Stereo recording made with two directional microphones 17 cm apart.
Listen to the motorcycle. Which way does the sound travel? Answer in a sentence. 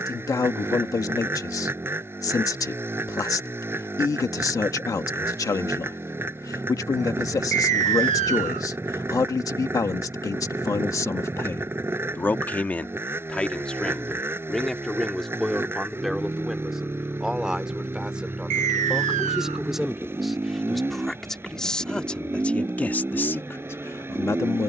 In this clip you hear the motorcycle stay in one place.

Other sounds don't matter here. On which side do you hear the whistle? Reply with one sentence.
In this clip you hear the whistle on the right.